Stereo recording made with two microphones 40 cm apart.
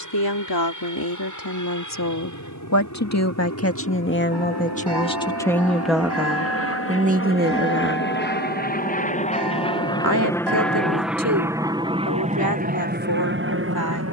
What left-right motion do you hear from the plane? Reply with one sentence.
You can hear the plane go from the left side to the right.